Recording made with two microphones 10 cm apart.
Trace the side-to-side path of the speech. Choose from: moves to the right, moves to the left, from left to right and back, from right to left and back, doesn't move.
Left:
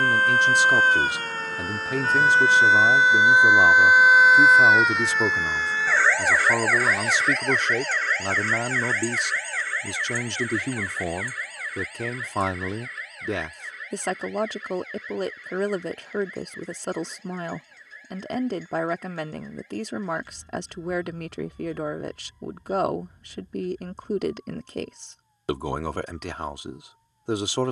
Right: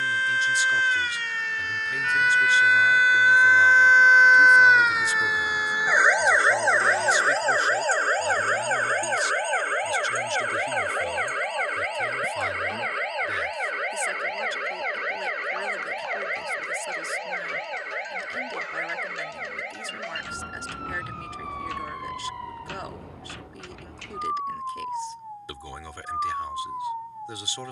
doesn't move.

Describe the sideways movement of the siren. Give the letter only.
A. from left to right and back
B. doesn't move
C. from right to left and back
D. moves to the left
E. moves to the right
E.